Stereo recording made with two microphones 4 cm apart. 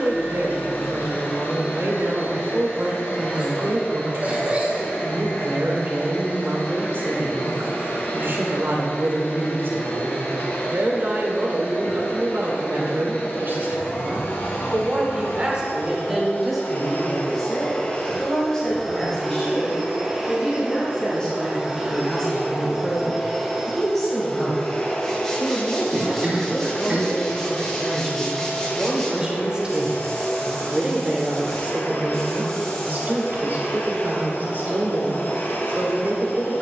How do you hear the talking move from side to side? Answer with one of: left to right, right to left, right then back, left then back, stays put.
left then back.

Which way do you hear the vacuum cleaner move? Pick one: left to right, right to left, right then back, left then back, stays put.
right then back.